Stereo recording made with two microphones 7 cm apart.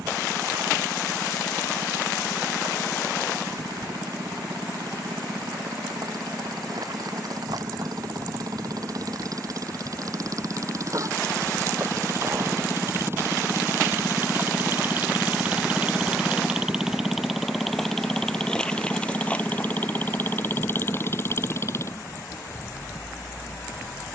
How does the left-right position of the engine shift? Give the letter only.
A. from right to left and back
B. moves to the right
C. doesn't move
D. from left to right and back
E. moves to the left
E.